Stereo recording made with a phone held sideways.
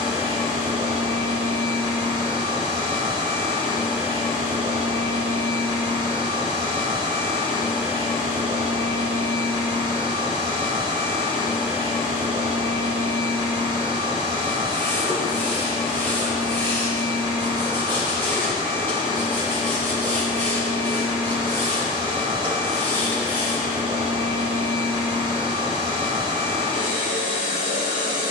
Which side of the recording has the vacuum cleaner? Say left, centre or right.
right.